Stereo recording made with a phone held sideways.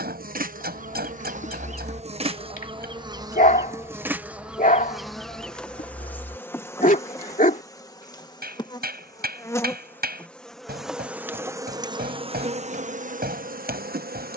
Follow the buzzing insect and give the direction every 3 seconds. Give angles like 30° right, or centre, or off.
50° right, 10° right, 20° left, centre, 60° right.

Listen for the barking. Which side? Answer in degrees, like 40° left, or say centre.
60° left.